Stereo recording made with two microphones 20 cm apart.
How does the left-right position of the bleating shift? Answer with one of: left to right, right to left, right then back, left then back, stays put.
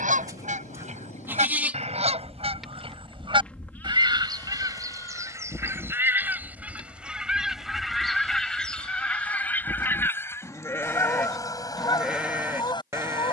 left then back.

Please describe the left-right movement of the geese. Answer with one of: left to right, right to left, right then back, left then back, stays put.
right to left.